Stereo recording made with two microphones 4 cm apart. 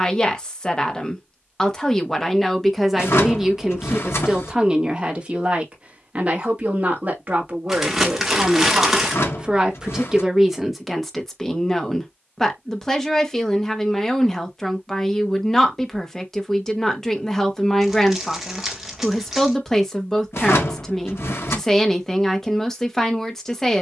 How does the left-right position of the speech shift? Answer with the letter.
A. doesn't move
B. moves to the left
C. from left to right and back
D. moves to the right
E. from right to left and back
C.